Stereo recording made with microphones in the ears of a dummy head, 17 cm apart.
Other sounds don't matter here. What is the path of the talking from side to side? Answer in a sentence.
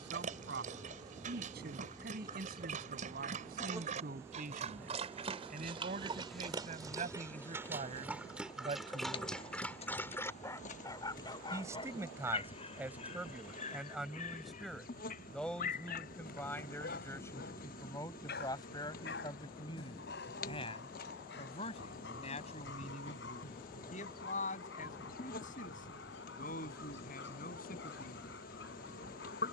You can hear the talking move to the left.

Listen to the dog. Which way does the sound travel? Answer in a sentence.
You can hear the dog move from right to left.